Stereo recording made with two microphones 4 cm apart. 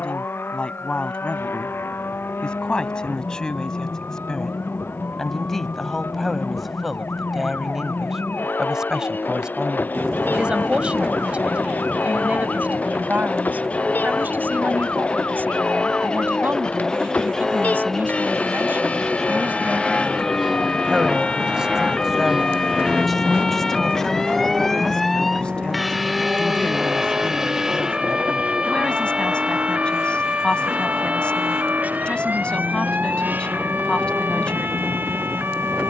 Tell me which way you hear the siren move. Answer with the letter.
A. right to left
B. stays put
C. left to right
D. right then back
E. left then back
C.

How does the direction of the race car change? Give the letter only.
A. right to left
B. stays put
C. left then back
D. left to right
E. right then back
D.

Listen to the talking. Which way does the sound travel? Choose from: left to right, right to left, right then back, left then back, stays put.
right then back.